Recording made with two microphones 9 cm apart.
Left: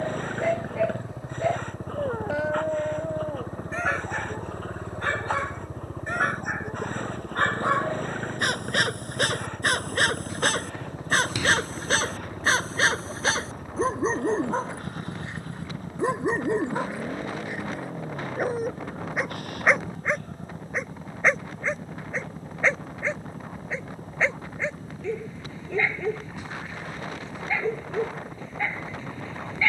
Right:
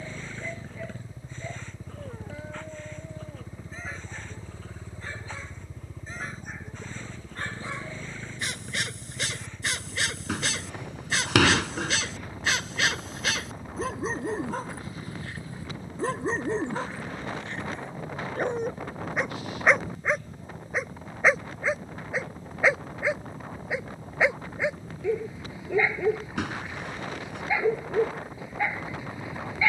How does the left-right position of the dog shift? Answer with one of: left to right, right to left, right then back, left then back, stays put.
left to right.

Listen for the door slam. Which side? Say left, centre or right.
right.